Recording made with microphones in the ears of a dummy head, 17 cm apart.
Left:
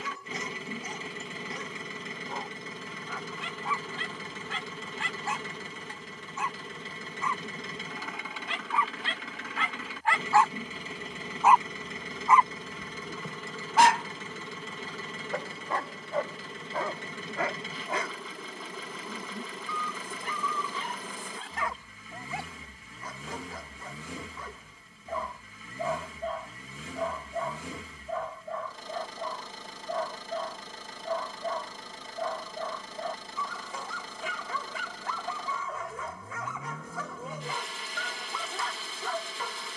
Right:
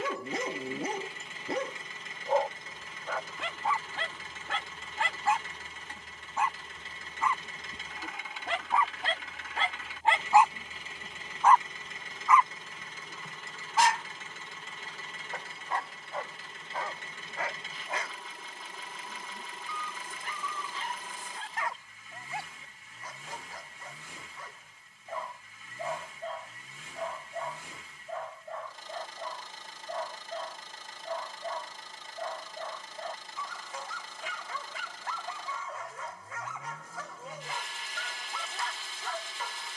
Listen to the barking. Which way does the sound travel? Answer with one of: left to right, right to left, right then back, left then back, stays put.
right to left.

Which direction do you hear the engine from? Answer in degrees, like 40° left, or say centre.
70° left.